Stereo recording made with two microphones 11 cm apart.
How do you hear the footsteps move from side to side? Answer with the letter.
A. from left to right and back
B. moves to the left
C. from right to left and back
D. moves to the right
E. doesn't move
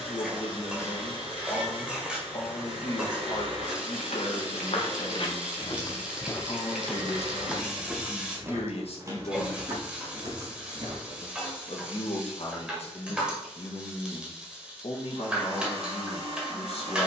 D.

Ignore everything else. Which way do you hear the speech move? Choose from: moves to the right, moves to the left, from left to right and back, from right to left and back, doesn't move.
doesn't move.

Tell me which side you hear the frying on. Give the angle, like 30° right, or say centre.
10° right.